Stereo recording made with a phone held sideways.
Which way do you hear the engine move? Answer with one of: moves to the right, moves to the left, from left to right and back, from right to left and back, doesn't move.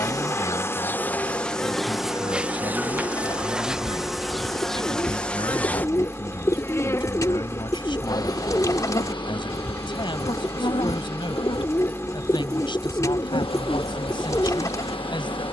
doesn't move.